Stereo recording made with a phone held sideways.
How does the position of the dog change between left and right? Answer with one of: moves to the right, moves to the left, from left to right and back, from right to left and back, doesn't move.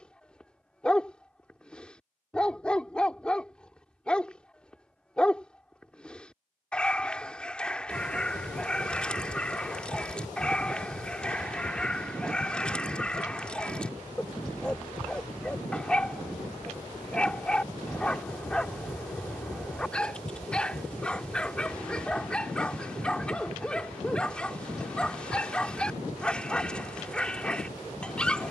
doesn't move.